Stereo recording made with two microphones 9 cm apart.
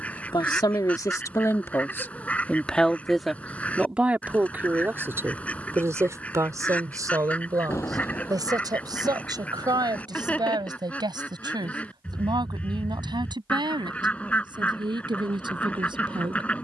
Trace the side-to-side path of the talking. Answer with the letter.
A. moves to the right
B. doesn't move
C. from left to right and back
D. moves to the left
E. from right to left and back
A.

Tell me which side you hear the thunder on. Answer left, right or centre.
left.